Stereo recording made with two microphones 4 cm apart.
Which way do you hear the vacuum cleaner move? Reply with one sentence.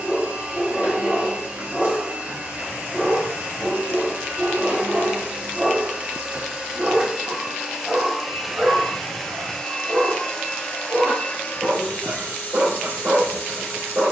In this clip you hear the vacuum cleaner move to the left.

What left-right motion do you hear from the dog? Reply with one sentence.
In this clip you hear the dog travel towards the right.